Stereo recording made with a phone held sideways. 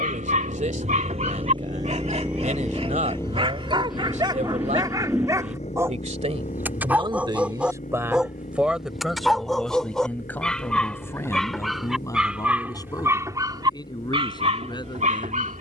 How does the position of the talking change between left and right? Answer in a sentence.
You can hear the talking go from the right side to the left.